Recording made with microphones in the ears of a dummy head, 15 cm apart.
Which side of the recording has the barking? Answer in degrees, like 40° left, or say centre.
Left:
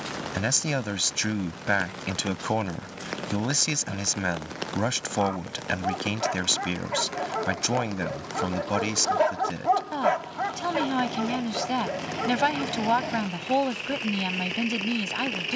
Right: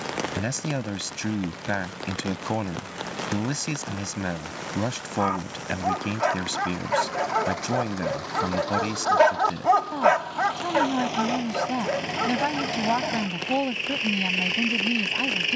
40° right.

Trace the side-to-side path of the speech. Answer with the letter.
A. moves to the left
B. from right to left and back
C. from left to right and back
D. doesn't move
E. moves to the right
D.